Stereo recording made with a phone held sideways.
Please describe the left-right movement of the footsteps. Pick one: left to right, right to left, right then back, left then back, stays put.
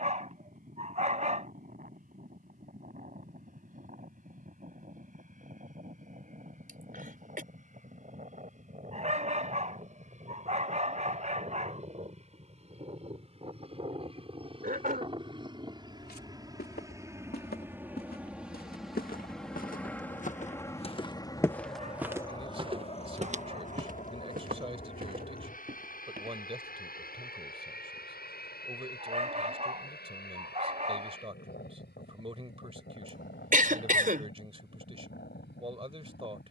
left to right.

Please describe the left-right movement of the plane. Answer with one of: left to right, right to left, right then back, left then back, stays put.
right to left.